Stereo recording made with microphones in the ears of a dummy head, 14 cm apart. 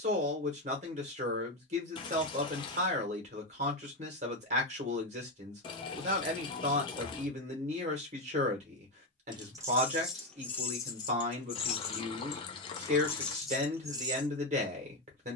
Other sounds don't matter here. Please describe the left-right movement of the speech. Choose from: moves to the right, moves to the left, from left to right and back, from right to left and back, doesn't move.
doesn't move.